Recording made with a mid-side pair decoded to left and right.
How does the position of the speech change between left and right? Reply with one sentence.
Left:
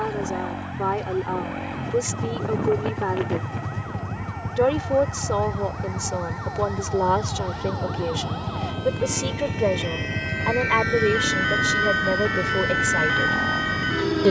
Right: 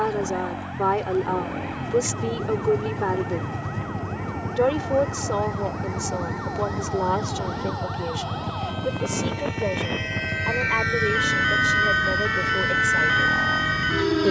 In this clip you hear the speech move from right to left.